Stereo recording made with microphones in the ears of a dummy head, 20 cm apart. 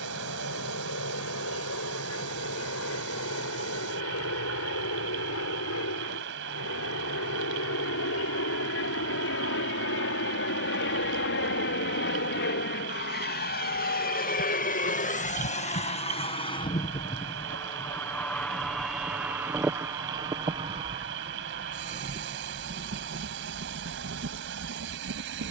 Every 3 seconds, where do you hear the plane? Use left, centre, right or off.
left, left, left, left, left, left, centre, right, right.